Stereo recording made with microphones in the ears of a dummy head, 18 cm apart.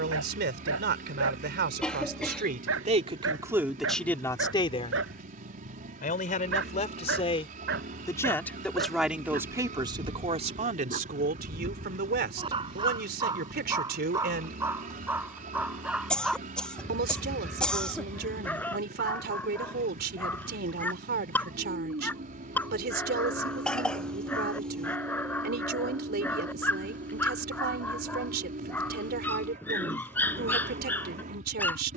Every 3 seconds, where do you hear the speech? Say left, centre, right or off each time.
right, centre, left, right, right, right, right, right, right, right, right.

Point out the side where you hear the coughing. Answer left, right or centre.
centre.